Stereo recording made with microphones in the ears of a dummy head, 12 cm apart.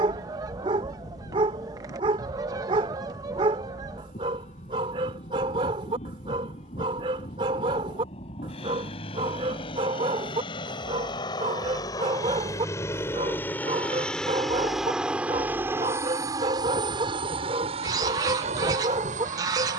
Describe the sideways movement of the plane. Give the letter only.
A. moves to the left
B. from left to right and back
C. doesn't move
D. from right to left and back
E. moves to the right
E.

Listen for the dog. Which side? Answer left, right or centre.
right.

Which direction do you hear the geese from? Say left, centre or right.
right.